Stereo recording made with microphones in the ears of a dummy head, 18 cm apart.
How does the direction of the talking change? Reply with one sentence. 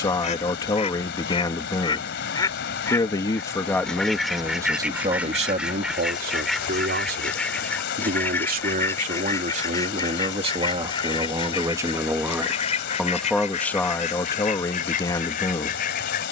In this clip you hear the talking move from left to right and back again.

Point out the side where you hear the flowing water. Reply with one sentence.
You can hear the flowing water on the left.